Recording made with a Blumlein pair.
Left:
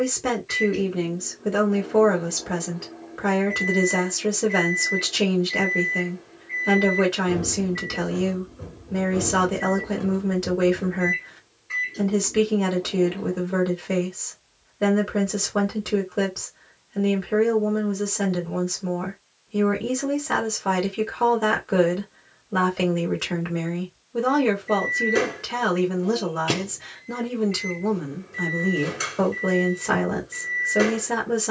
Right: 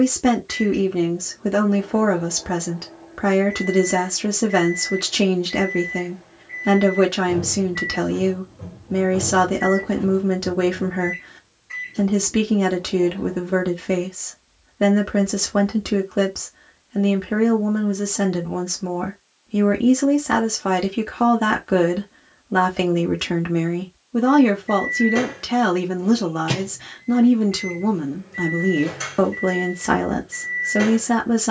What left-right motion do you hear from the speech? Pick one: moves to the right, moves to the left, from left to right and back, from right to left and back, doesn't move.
doesn't move.